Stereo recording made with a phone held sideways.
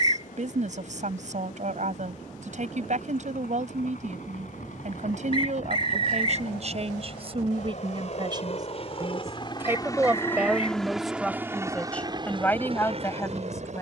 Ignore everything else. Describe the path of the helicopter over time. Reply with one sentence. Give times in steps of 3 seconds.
In this clip you hear the helicopter on the left from 0 s, in the centre from 9 s and on the right from 12 s.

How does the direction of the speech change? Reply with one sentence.
You can hear the speech travel towards the left.